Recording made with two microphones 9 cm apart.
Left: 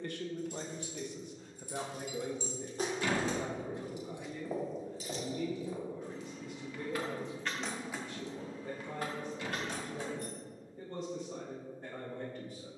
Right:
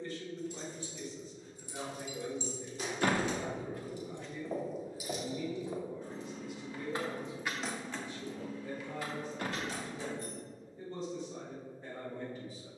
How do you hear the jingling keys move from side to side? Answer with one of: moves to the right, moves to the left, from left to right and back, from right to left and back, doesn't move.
from left to right and back.